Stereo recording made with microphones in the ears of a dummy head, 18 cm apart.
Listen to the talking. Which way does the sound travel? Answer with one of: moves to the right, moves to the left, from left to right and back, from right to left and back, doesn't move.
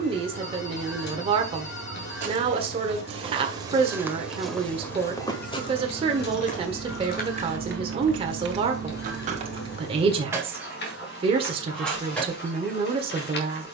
doesn't move.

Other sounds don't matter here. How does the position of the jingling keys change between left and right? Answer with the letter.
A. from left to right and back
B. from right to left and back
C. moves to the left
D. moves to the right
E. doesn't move
A.